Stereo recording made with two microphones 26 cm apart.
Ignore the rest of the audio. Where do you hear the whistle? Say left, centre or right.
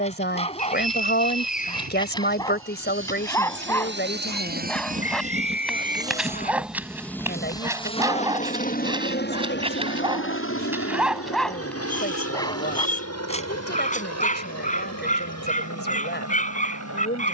left.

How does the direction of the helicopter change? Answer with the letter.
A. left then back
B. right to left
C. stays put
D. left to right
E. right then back
B.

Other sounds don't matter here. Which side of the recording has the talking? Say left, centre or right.
left.